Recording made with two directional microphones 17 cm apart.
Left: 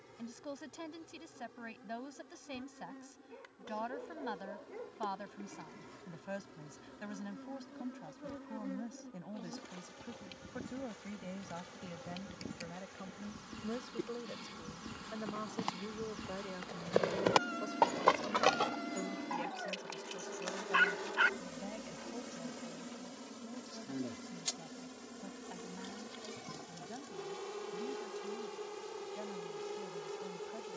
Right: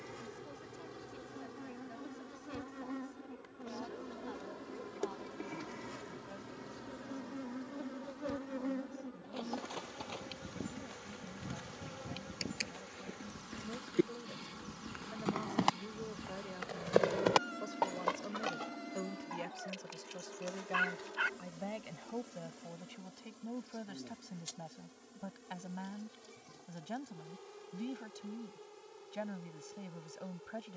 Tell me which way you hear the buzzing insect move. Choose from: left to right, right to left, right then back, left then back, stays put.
right to left.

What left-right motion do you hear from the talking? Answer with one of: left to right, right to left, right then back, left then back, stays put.
left to right.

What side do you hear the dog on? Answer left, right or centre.
left.